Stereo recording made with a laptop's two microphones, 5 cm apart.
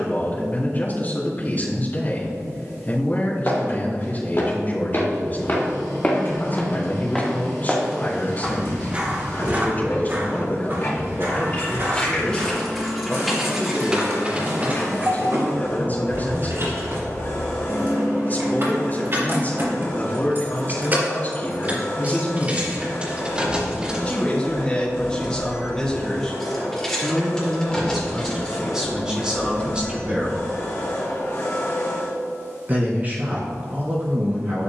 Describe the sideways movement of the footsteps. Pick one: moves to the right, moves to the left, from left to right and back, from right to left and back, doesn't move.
moves to the right.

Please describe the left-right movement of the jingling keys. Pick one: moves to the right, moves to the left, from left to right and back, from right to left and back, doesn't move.
from left to right and back.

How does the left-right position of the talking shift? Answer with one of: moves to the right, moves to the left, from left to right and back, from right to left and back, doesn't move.
moves to the right.